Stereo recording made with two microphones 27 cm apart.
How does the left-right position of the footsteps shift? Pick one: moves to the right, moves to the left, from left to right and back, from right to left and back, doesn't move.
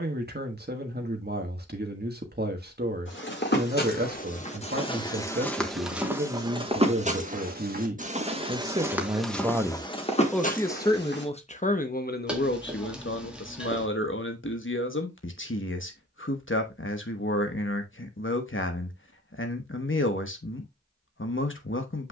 from left to right and back.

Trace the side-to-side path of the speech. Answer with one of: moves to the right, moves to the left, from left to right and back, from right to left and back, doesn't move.
moves to the left.